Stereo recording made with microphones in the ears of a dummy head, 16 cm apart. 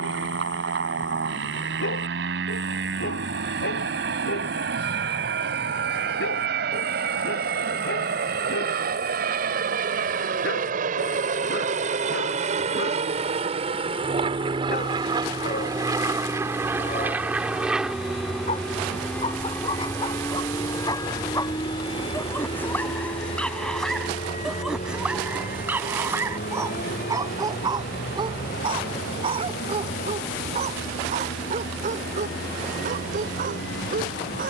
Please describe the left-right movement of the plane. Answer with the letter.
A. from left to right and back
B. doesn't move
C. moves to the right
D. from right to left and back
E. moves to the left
E.